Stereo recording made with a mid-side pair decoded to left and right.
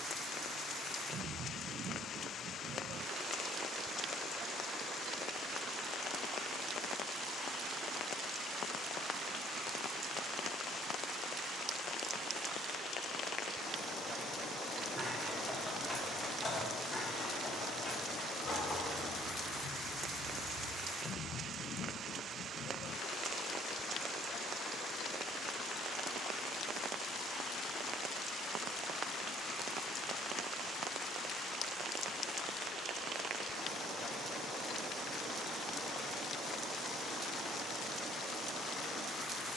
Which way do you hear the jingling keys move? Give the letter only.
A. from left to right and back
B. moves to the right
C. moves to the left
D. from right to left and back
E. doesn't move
D.